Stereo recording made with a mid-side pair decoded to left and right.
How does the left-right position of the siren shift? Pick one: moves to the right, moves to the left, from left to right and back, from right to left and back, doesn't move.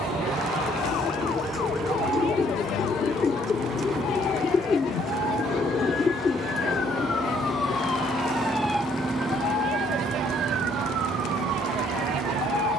moves to the right.